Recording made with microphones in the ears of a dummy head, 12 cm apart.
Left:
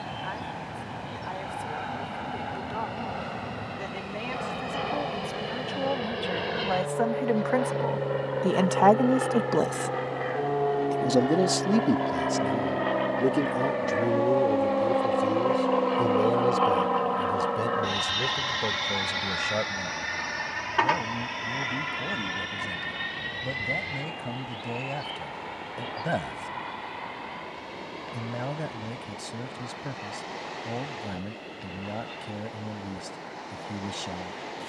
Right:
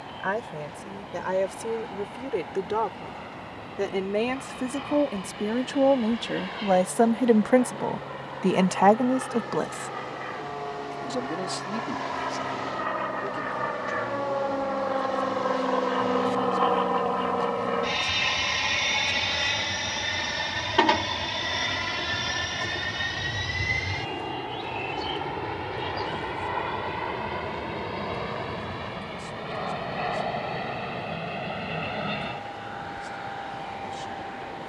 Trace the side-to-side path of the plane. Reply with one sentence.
You can hear the plane go from the left side to the right.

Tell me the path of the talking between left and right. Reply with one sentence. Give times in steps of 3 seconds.
You can hear the talking on the right from 0 s and on the left from 9 s.